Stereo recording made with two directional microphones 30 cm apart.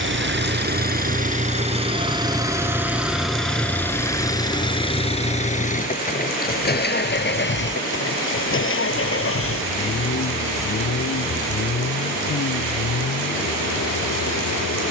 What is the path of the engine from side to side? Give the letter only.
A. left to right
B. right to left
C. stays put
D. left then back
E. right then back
B.